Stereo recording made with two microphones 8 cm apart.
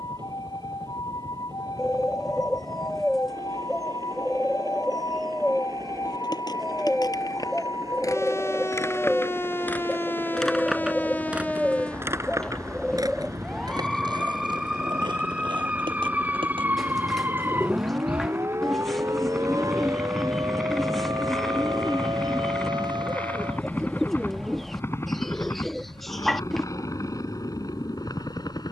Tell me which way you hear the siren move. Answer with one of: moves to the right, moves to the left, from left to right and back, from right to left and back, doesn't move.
moves to the right.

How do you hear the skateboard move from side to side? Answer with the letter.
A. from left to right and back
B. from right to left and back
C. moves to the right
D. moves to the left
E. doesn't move
C.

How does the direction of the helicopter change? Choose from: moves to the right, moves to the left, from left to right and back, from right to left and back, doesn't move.
moves to the left.